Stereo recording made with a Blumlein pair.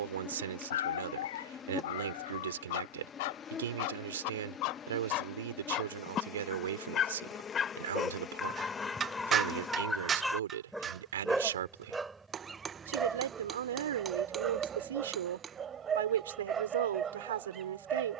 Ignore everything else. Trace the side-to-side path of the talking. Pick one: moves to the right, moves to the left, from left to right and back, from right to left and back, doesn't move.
doesn't move.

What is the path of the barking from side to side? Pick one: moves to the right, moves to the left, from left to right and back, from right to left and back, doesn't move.
moves to the right.